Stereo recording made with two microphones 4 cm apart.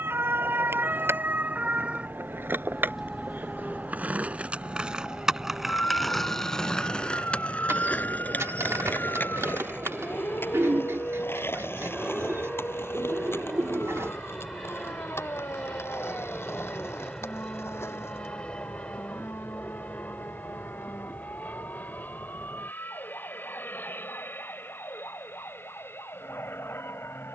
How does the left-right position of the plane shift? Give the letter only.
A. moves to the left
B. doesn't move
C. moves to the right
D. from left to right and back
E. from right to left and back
A.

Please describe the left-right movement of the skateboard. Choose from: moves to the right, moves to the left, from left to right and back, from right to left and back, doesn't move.
moves to the left.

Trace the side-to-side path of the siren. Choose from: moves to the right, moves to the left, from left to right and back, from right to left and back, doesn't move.
moves to the left.